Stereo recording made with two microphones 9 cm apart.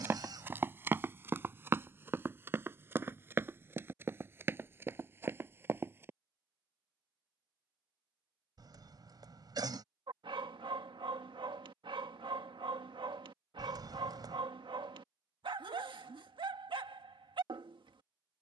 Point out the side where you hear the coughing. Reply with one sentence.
You can hear the coughing on the right.